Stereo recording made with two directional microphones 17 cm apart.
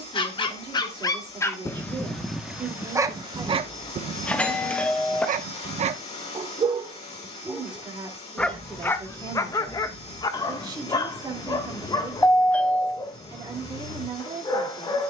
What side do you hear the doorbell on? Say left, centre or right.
centre.